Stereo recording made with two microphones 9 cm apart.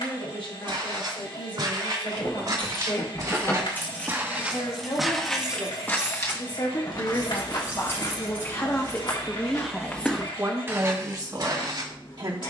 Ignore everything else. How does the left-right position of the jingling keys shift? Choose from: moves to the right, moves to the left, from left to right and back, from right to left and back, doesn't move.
moves to the right.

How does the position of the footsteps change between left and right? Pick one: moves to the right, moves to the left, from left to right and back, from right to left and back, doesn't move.
from right to left and back.